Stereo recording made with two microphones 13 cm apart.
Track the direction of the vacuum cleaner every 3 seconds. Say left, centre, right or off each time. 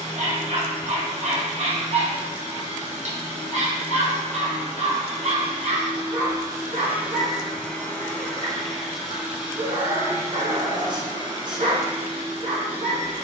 right, right, centre, right, right.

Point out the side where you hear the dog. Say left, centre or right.
right.